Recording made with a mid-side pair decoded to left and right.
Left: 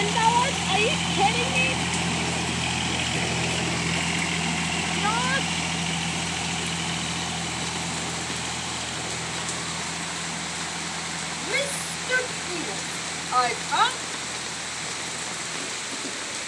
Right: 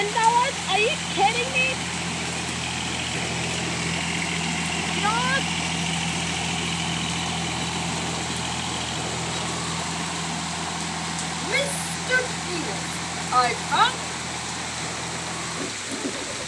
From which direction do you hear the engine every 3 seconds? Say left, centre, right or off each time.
left, centre, right, right, right, right.